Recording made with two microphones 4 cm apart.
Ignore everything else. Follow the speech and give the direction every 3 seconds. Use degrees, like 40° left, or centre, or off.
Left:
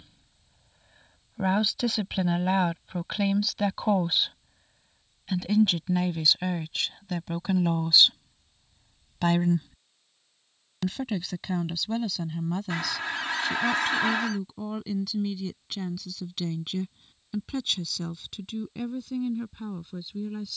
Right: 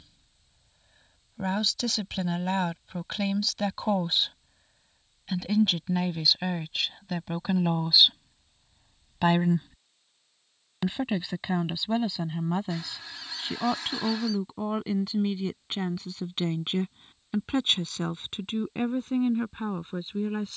10° left, centre, 10° right, 20° right, 30° right, 30° right, 40° right.